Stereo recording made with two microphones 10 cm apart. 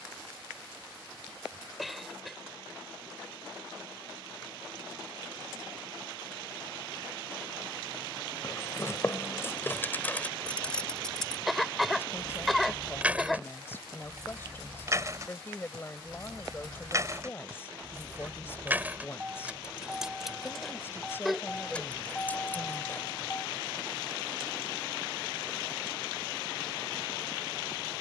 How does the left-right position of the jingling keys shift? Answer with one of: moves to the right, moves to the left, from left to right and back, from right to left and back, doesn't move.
from left to right and back.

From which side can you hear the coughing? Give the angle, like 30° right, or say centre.
centre.